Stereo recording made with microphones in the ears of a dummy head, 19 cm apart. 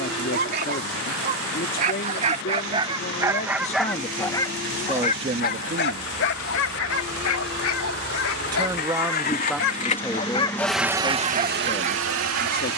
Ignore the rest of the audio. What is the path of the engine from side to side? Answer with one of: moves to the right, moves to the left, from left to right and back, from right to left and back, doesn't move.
moves to the right.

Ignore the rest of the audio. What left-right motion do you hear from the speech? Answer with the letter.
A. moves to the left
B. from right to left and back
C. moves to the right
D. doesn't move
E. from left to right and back
E.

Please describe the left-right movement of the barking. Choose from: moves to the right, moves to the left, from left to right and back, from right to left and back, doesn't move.
from right to left and back.